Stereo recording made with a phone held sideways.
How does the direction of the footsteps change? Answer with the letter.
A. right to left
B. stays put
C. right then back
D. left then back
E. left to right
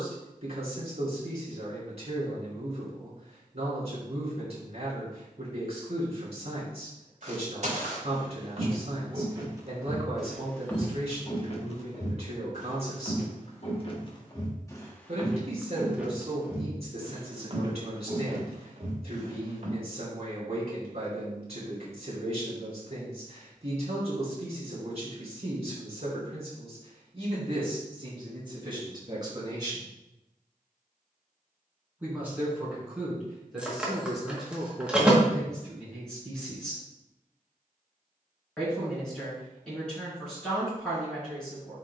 D.